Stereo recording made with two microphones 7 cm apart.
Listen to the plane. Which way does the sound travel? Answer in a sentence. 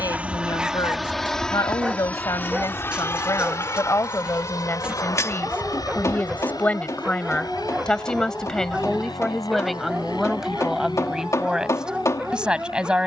In this clip you hear the plane move to the left.